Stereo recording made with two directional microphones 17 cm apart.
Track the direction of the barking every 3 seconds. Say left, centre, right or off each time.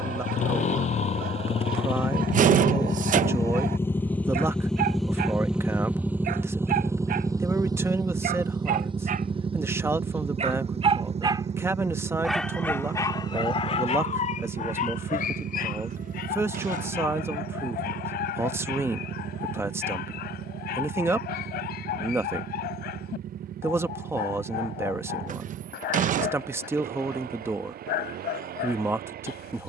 right, right, right, right, left, left, left, left, left, left.